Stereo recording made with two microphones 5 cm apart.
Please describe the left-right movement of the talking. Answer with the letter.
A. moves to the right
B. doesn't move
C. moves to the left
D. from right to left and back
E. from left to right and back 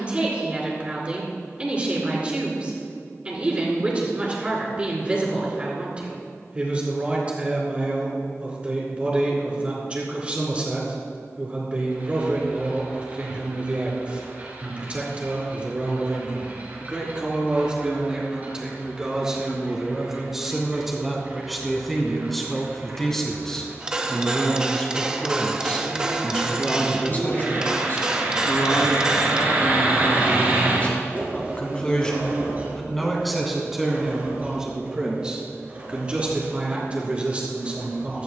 D.